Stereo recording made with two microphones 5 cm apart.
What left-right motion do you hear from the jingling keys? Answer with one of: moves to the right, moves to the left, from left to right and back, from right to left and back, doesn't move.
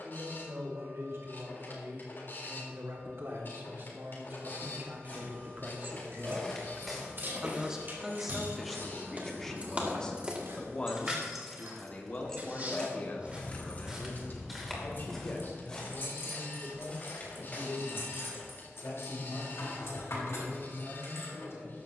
moves to the left.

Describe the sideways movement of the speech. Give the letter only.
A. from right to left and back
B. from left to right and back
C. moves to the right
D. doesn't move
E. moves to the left
E.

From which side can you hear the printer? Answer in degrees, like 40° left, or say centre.
50° left.